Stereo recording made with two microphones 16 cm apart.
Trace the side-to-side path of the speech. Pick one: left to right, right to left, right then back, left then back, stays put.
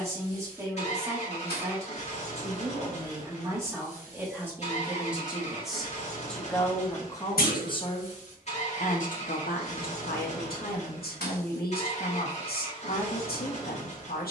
right to left.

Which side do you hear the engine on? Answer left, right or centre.
left.